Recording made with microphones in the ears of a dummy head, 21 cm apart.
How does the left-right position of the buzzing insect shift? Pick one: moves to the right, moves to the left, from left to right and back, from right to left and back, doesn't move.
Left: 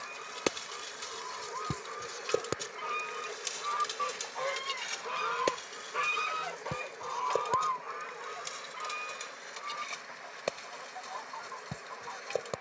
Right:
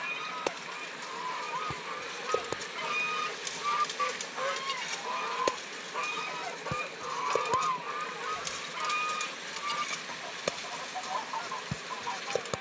moves to the right.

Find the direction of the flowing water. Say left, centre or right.
right.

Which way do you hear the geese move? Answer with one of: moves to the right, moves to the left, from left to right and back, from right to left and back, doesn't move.
from right to left and back.